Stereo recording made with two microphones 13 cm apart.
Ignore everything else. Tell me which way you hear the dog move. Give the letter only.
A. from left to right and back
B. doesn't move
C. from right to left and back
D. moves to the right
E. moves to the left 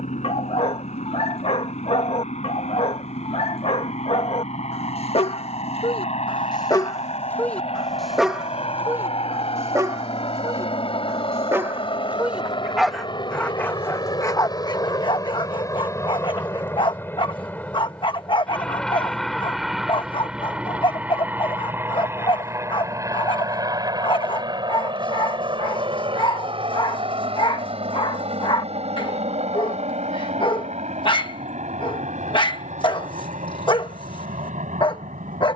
A.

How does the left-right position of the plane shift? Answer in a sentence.
In this clip you hear the plane move from left to right.